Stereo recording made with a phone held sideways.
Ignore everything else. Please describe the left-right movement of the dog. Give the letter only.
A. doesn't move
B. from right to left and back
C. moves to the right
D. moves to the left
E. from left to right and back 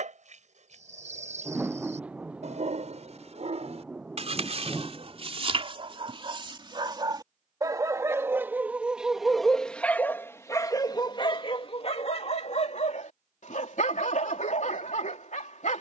D.